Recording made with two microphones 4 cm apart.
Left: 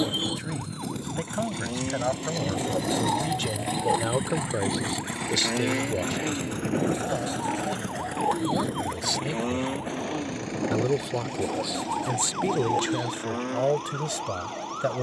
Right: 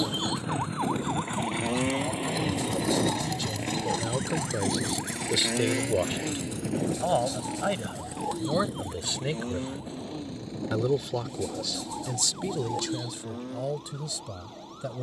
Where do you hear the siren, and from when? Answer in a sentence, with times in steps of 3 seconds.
In this clip you hear the siren on the right from 0 s, in the centre from 3 s and on the left from 6 s.